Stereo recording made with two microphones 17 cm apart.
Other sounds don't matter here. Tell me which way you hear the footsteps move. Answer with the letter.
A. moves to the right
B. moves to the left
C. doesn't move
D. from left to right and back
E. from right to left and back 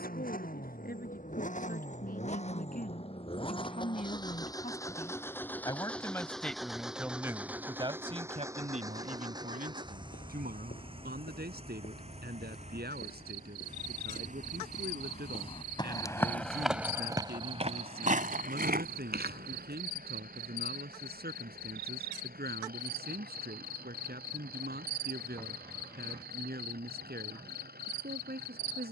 A.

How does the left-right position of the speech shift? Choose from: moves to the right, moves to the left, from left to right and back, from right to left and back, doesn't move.
moves to the right.